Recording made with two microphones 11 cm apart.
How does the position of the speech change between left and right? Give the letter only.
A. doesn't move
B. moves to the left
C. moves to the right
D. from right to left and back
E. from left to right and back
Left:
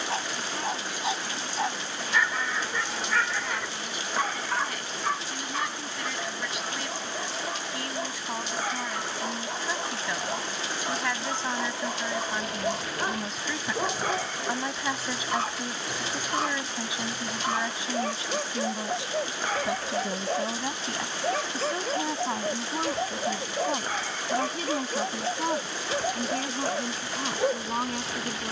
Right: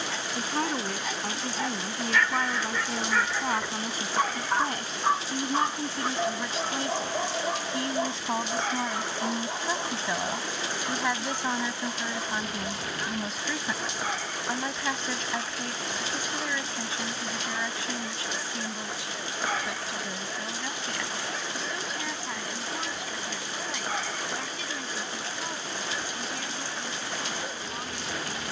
B.